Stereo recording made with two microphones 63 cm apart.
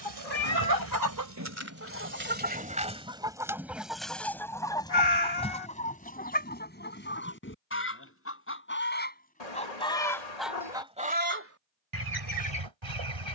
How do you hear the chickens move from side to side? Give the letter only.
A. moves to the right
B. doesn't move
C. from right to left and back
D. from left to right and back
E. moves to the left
C.